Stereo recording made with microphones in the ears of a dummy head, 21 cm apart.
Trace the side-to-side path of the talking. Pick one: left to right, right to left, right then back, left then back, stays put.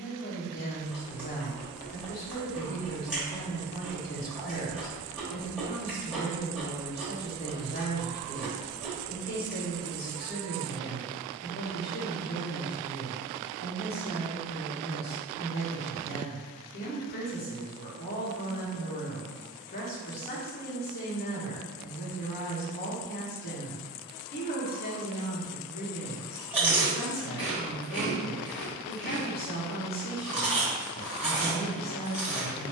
stays put.